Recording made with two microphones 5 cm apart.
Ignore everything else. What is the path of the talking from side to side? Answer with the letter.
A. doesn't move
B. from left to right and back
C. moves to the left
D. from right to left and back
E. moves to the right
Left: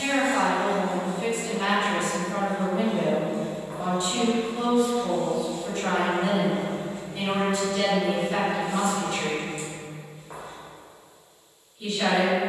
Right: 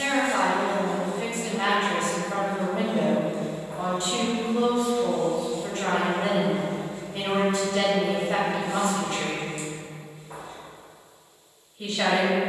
A.